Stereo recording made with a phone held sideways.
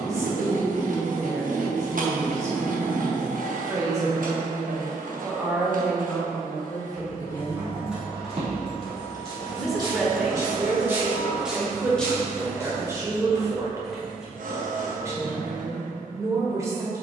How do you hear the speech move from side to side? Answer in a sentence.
You can hear the speech go left and come back.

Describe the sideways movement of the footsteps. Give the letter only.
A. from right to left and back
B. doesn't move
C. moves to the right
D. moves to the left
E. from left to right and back
D.